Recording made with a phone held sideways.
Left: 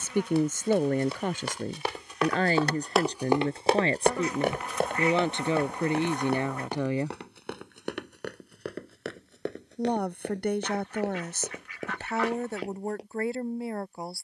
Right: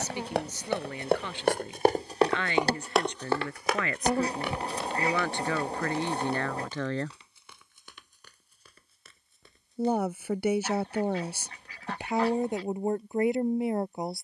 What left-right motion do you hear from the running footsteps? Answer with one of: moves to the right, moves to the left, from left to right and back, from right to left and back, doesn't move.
moves to the left.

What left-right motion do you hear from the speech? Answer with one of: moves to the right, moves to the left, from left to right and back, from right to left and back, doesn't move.
moves to the right.